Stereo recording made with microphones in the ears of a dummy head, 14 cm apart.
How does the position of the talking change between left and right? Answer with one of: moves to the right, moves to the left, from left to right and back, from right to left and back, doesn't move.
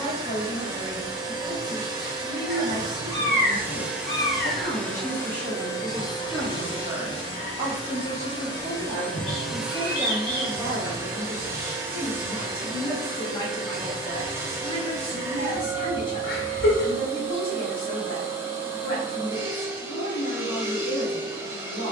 from left to right and back.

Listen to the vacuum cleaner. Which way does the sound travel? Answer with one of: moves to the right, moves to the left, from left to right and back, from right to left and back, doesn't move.
from right to left and back.